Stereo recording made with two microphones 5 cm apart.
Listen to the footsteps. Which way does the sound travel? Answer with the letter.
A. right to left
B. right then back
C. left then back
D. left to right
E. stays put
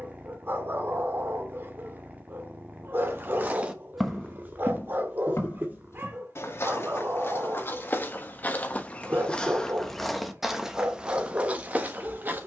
C.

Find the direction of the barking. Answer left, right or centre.
right.